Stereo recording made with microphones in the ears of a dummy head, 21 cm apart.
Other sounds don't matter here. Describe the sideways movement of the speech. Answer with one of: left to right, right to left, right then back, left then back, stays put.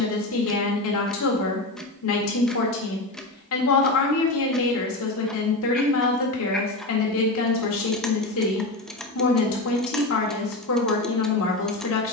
stays put.